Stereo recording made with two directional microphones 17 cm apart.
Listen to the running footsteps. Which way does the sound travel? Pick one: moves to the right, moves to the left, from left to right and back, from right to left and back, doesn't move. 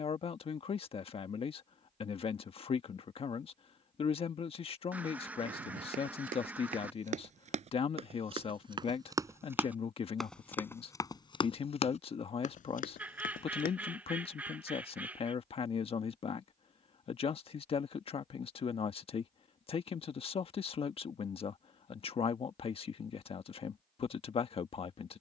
moves to the left.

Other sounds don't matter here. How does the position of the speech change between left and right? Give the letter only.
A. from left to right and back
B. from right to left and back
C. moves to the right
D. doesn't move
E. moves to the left
D.